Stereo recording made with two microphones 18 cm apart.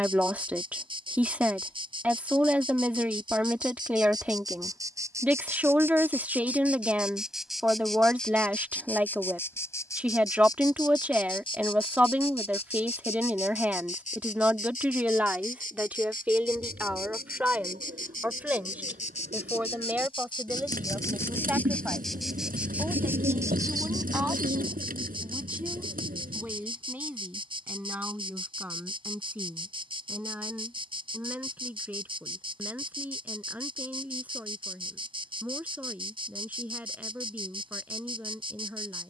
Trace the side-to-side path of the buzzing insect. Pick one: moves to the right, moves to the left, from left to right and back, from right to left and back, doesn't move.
from right to left and back.